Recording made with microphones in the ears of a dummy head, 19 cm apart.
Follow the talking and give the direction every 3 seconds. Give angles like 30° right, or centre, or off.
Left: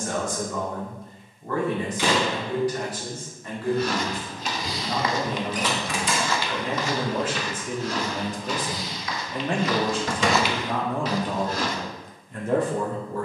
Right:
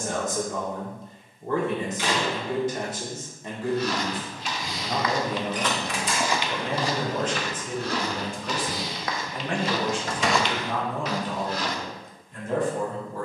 20° right, 20° right, 10° left, 40° left, 50° left.